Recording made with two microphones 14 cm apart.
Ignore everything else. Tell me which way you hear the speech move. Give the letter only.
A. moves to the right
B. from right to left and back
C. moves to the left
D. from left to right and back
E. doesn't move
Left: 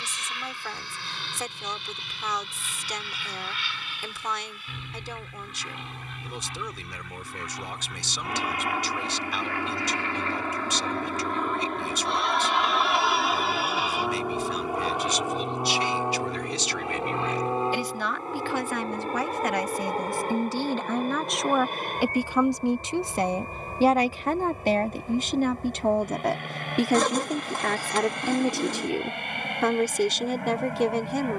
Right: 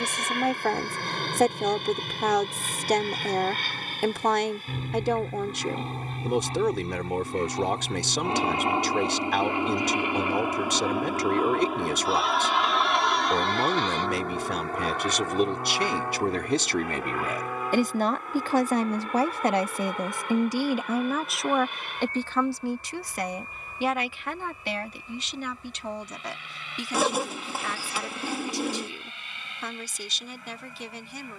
C.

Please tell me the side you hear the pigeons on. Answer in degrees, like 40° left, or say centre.
10° right.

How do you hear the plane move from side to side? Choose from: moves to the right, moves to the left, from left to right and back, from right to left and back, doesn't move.
moves to the left.